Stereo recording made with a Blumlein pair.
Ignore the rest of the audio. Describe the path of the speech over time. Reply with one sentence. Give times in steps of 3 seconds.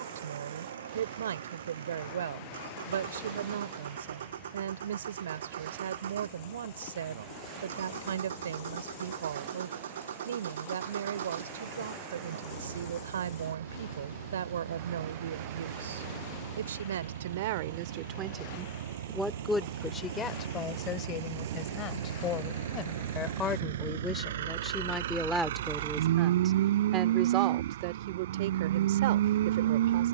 You can hear the speech on the right from 0 s, in the centre from 18 s, on the left from 21 s, in the centre from 24 s and on the right from 27 s.